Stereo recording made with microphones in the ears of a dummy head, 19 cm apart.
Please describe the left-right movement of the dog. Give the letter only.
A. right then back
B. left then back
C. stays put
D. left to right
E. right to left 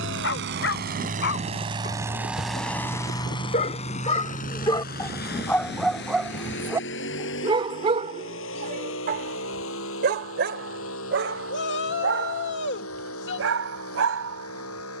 D.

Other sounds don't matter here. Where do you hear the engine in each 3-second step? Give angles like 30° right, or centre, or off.
30° right, 40° left, 60° left, 60° left, 70° left.